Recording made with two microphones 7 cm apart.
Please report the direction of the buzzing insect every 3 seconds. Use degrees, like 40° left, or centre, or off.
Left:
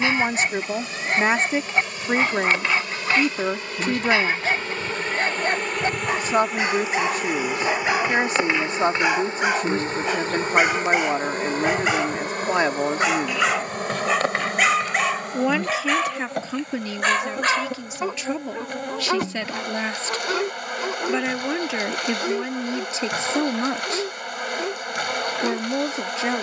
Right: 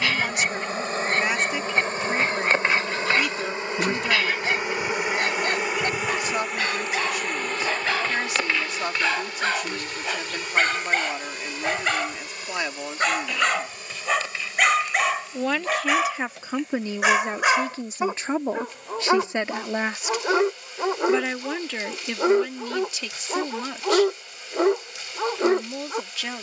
40° right, 20° right, 10° left, 40° left, 60° left, 70° left, 70° left, 70° left, 70° left.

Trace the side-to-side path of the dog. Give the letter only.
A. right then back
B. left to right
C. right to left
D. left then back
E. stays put
B.